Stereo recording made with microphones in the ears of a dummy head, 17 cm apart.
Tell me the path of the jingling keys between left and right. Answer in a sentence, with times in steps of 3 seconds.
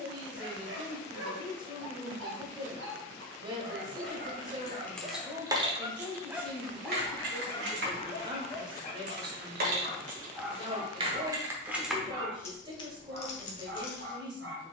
You can hear the jingling keys not at all from 0 s, in the centre from 3 s, on the right from 6 s and on the left from 12 s.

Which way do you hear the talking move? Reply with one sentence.
You can hear the talking stay put.